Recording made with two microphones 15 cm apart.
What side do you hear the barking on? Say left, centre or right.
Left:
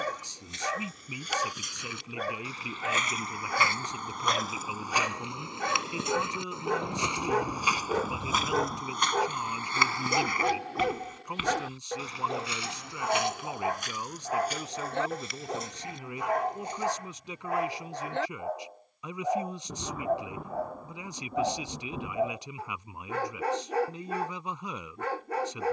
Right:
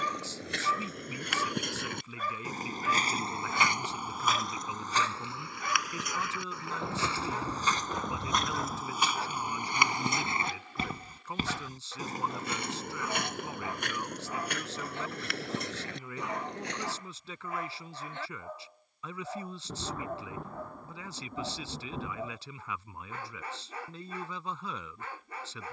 left.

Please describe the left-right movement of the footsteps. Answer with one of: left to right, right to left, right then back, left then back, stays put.
left then back.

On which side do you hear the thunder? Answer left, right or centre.
centre.